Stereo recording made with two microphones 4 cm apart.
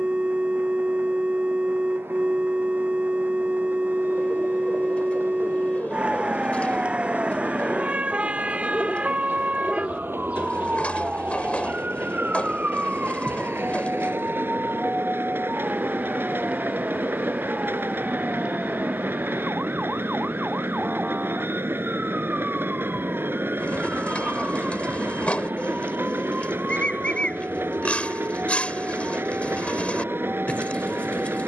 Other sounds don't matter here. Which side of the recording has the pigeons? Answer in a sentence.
You can hear the pigeons on the left.